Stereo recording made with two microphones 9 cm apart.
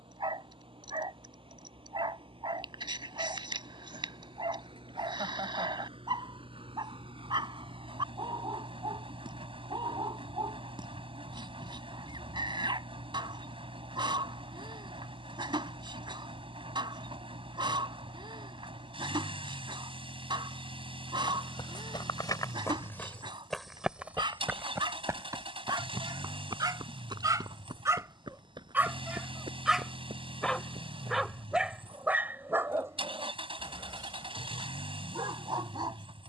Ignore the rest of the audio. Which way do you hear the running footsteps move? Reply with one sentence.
You can hear the running footsteps move from left to right.